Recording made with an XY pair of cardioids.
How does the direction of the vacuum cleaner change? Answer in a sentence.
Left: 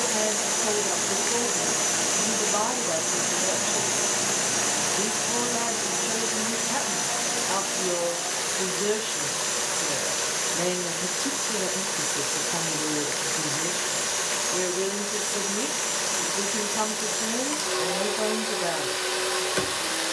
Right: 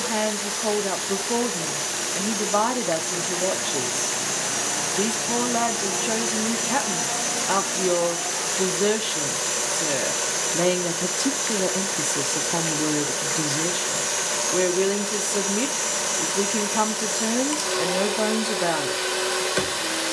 You can hear the vacuum cleaner go from the left side to the right.